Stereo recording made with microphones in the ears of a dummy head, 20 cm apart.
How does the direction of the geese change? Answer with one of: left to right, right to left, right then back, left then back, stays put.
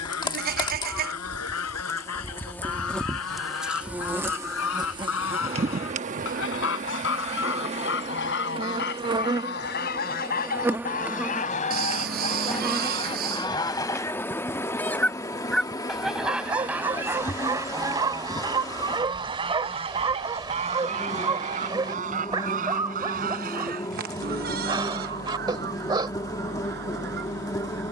left to right.